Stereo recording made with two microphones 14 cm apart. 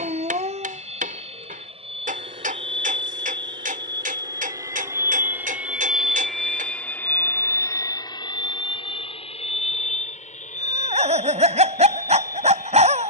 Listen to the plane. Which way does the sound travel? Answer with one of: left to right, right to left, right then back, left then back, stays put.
right to left.